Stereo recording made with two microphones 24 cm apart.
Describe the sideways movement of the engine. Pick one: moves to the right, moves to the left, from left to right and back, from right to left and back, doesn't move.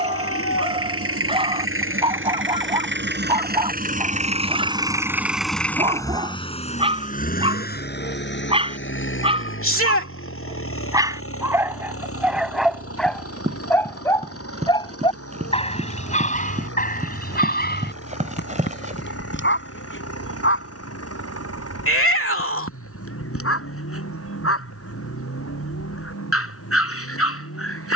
moves to the left.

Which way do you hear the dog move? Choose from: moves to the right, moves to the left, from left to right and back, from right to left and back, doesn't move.
moves to the left.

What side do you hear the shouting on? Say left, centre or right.
left.